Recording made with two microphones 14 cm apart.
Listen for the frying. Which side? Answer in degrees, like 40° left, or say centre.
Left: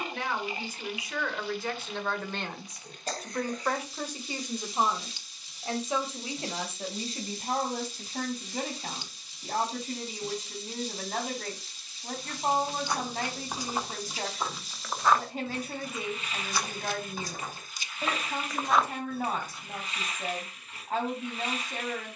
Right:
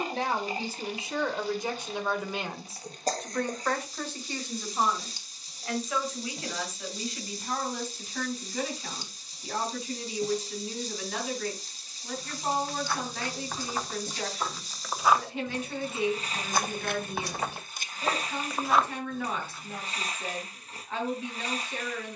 40° right.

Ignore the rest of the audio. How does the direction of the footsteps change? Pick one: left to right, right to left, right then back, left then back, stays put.
right then back.